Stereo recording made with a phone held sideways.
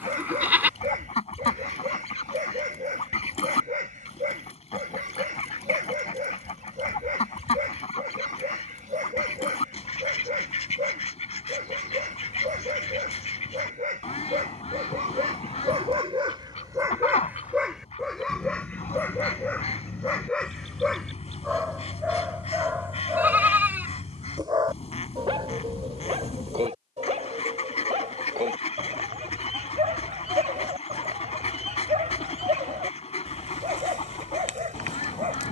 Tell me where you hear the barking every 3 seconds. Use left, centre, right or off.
right, right, right, right, right, right, centre, centre, right, right, right, right.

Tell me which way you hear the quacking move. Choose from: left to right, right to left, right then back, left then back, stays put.
stays put.